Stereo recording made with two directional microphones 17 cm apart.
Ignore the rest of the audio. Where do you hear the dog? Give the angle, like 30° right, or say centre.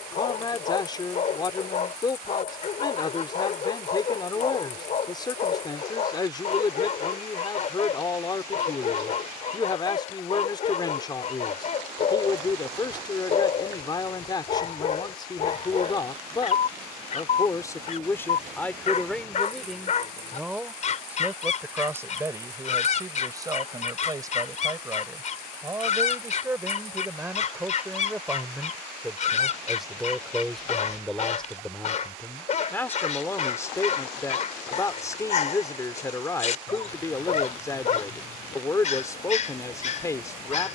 40° left.